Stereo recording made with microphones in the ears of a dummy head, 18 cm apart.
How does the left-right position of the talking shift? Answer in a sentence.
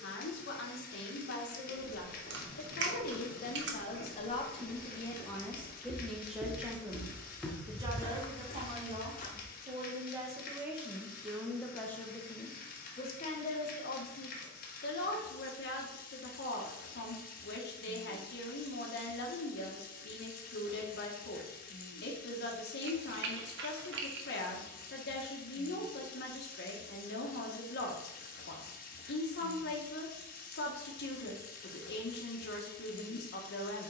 In this clip you hear the talking go right and come back.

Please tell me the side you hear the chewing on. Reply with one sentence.
You can hear the chewing on the right.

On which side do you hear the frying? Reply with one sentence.
In this clip you hear the frying on the left.